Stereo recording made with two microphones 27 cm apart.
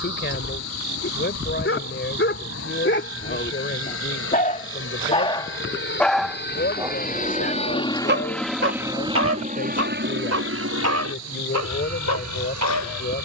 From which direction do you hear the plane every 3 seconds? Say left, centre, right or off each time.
left, left, left, right, right.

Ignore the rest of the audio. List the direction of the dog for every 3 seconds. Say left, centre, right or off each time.
left, left, right, right, right.